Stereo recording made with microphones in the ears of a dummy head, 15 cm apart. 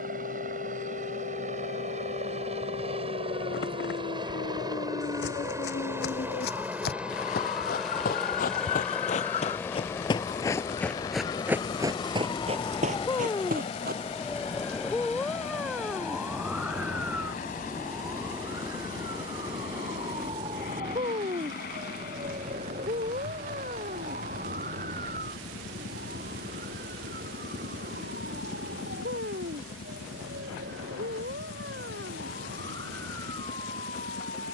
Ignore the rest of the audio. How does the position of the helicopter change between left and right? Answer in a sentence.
You can hear the helicopter travel towards the left.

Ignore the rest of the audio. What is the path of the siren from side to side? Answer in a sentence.
You can hear the siren travel towards the right.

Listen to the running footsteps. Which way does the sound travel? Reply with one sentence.
You can hear the running footsteps go from the left side to the right.